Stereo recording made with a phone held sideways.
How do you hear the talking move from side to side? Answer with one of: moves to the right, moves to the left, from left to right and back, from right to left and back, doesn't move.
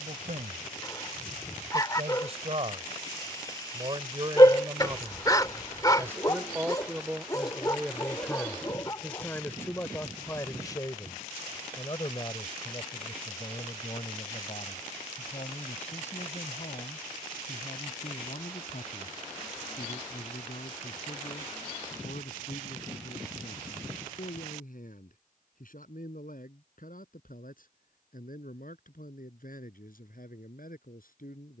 moves to the left.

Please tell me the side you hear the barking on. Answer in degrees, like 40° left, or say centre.
30° left.